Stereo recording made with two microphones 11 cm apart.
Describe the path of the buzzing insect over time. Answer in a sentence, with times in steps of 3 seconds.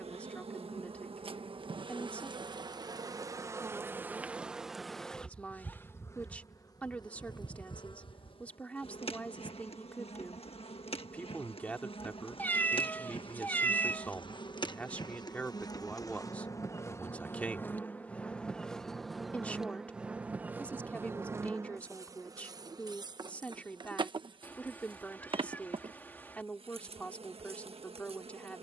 You can hear the buzzing insect on the right from 0 s, in the centre from 3 s, on the left from 6 s, in the centre from 18 s and on the right from 21 s.